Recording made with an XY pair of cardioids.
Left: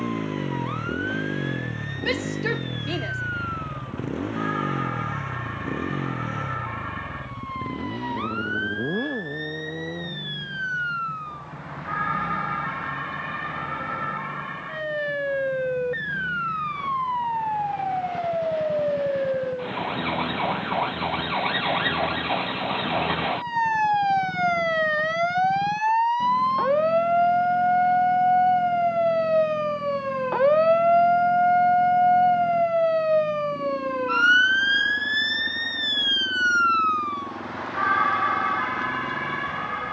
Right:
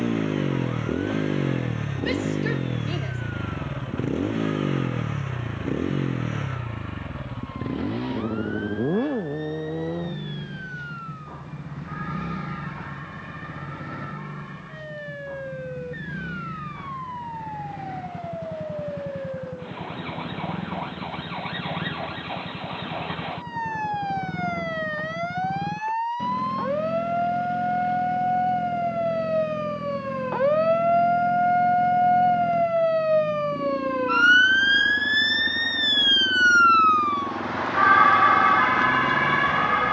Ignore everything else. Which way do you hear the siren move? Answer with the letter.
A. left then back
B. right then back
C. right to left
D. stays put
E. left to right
E.